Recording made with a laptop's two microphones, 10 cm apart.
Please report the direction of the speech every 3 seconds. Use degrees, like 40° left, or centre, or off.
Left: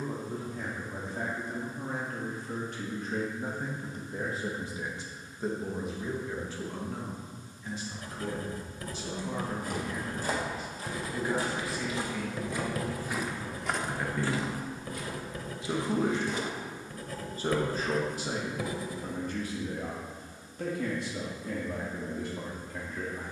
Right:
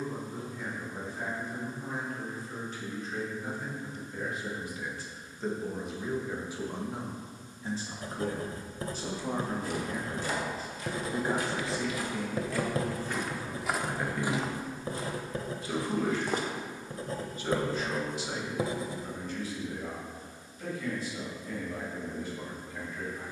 70° left, 30° left, 20° right, 40° right, 10° right, 30° left, 50° left, 70° left.